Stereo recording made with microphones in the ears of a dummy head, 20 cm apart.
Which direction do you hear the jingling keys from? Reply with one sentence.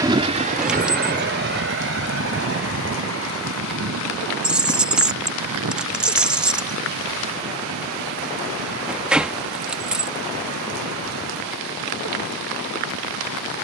You can hear the jingling keys in the centre.